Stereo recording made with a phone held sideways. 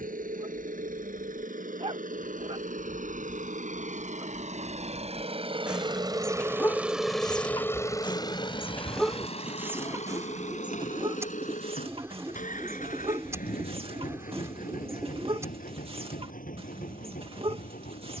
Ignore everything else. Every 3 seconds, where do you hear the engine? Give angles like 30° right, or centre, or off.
70° right, 50° right, 10° left, 60° left, 70° left, 80° left.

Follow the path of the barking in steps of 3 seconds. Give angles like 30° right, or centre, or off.
40° right, 20° right, 20° left, 30° right, 40° right, 40° right.